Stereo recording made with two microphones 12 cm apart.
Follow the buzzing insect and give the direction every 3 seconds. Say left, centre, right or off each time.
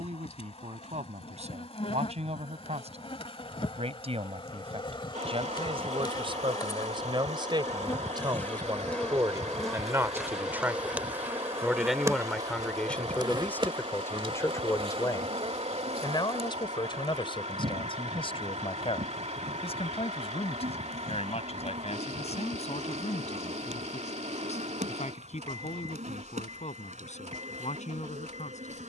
left, left, left, centre, right, right, right, right, right, right.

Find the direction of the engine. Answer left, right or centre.
right.